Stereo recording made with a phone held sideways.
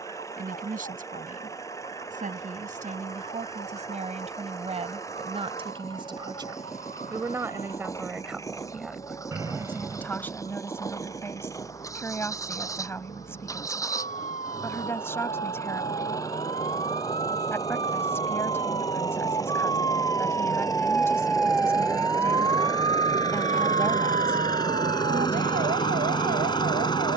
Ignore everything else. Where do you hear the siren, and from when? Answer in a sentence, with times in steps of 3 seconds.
In this clip you hear the siren on the left from 0 s and on the right from 21 s.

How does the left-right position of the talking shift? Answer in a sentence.
You can hear the talking travel towards the left.